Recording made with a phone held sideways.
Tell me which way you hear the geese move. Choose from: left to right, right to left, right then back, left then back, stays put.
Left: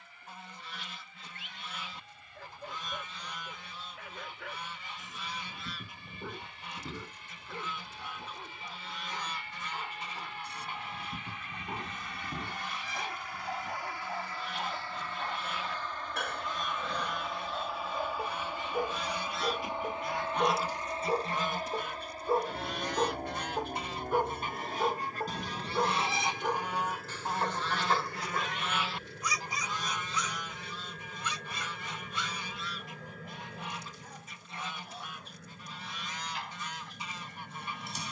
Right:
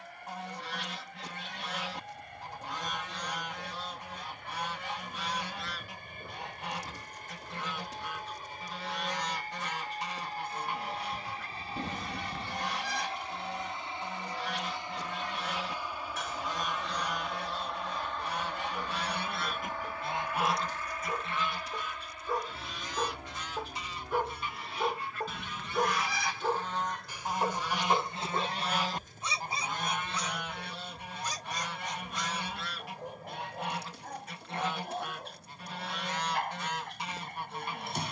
left then back.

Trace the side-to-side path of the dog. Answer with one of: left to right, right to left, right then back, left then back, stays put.
left to right.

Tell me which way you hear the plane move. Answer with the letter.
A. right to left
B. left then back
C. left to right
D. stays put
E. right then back
A.